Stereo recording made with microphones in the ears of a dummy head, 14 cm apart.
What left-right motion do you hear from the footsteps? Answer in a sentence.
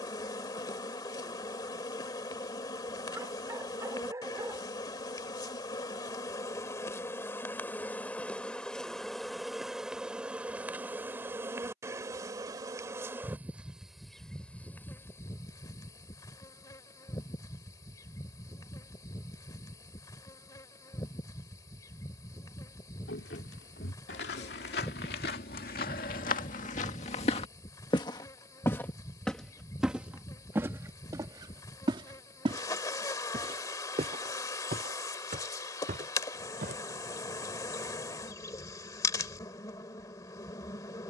You can hear the footsteps go from the left side to the right.